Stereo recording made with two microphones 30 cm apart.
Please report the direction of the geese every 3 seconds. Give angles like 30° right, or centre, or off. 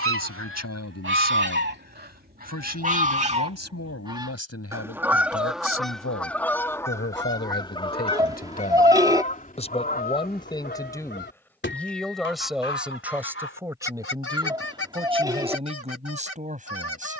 40° right, 10° right, 10° left, 30° left, 40° left, 50° left.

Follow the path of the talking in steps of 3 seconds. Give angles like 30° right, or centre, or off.
60° left, 50° left, 40° left, 10° left, 10° right, 20° right.